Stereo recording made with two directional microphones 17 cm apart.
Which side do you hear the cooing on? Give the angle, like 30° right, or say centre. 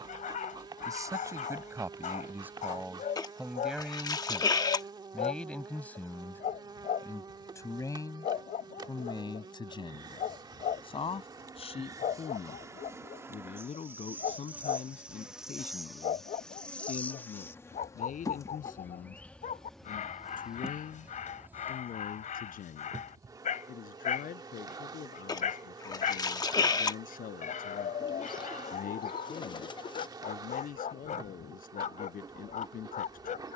30° left.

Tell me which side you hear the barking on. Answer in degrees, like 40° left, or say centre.
50° left.